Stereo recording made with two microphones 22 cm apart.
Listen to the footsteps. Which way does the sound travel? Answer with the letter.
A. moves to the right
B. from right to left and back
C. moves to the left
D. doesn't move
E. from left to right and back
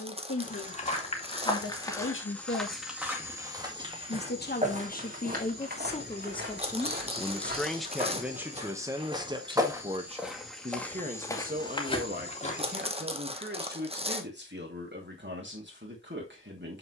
E.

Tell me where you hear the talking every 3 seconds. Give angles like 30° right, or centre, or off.
70° left, 40° left, centre, 30° right, 50° right, 50° right.